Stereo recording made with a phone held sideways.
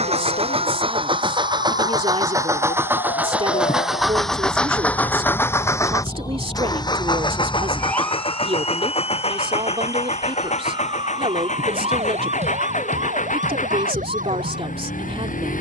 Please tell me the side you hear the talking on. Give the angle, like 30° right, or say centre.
40° right.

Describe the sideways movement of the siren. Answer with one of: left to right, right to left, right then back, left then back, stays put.
left to right.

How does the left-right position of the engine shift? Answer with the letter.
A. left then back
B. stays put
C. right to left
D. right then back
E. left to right
C.